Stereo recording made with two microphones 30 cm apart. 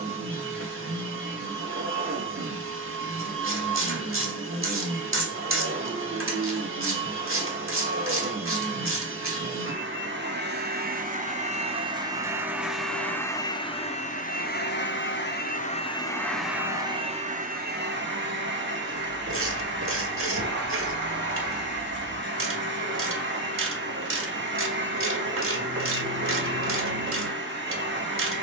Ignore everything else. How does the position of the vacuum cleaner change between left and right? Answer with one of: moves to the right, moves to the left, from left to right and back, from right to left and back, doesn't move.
from right to left and back.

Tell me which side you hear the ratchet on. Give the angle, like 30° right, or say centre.
40° right.